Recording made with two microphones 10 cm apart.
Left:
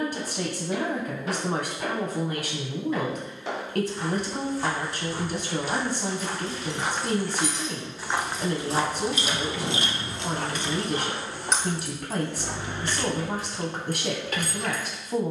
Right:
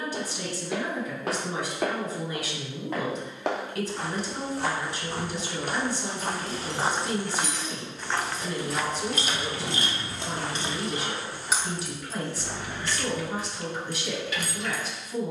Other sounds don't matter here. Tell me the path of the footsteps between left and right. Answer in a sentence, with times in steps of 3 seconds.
You can hear the footsteps on the right from 0 s, in the centre from 6 s and on the left from 9 s.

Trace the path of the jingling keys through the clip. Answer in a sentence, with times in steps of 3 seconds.
In this clip you hear the jingling keys not at all from 0 s, on the right from 6 s and on the left from 12 s.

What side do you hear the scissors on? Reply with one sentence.
You can hear the scissors on the left.